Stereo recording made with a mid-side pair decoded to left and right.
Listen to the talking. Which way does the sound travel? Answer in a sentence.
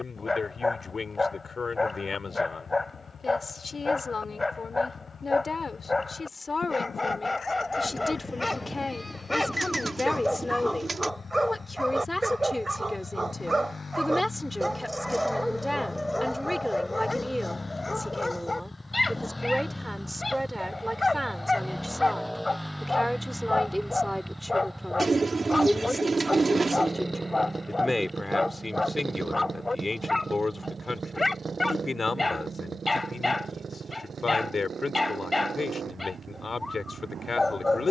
In this clip you hear the talking move from left to right and back again.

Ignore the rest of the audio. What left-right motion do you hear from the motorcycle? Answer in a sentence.
You can hear the motorcycle go from the left side to the right.